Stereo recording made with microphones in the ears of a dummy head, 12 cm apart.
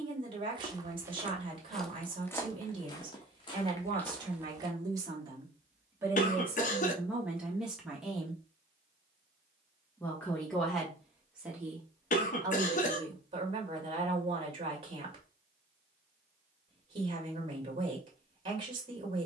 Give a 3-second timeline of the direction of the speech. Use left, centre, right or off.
right, right, centre, centre, right, right, right.